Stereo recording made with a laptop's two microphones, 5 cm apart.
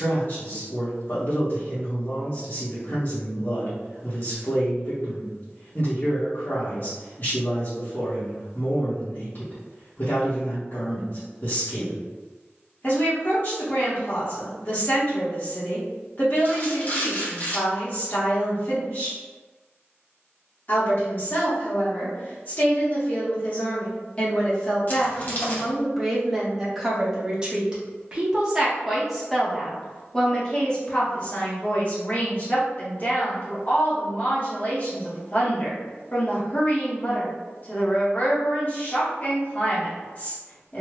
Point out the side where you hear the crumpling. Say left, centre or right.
left.